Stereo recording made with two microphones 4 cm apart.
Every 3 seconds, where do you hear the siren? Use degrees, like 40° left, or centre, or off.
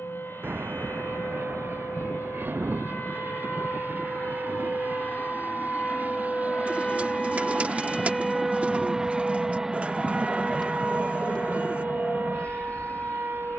60° left, 40° left, 10° left, 30° right, 50° right.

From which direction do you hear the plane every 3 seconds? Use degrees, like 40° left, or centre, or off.
60° right, 50° right, 30° right, 10° left, 40° left.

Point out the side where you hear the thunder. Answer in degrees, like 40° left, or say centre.
50° right.